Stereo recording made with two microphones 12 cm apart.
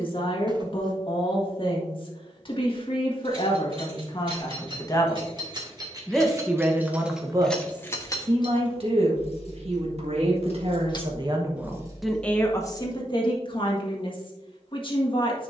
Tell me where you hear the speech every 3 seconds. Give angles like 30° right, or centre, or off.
50° left, 40° left, 30° right, 50° right, 40° left.